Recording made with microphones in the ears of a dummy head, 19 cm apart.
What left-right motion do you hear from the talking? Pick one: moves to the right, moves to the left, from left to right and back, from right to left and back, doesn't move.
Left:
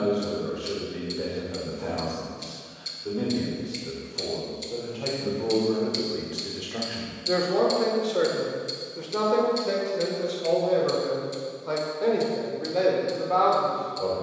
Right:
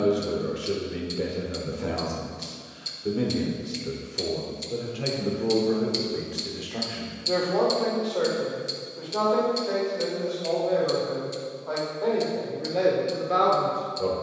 from right to left and back.